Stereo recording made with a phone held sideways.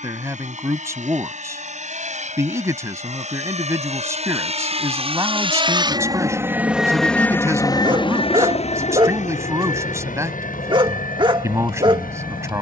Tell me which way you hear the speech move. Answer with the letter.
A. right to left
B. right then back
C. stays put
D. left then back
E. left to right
C.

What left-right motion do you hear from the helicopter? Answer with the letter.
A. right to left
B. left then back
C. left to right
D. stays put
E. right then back
A.